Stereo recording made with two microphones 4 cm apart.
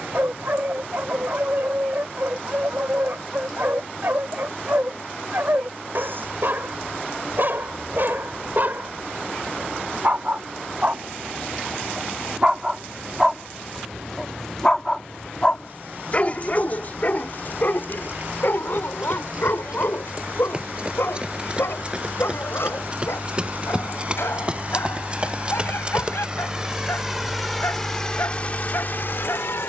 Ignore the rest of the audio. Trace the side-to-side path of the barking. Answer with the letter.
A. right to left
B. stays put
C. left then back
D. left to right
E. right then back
A.